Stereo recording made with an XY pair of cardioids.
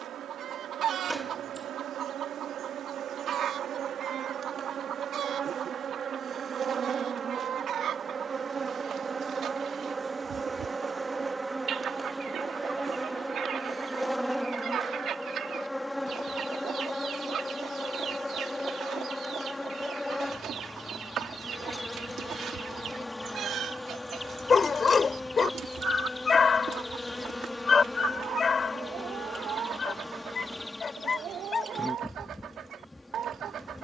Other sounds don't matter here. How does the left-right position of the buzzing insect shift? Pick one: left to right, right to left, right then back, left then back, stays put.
right to left.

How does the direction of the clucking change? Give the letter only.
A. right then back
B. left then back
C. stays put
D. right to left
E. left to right
C.